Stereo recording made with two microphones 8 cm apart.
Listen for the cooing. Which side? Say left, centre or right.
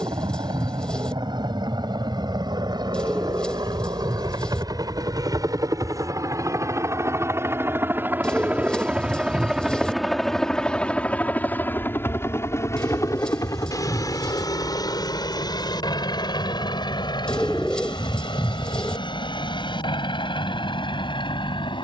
centre.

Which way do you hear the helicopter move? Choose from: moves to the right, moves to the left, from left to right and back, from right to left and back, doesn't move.
moves to the left.